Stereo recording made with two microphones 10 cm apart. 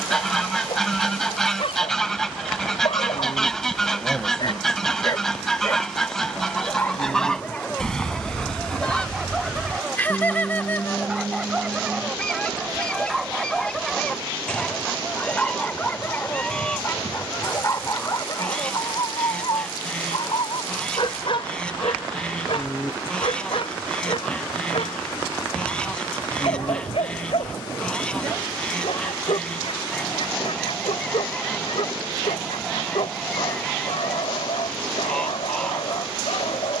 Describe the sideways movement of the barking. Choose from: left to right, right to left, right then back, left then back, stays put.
right then back.